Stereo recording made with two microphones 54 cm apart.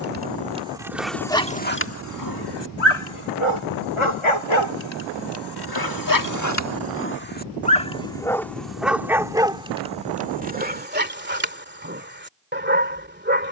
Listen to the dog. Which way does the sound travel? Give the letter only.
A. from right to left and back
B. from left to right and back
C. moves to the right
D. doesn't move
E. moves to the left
A.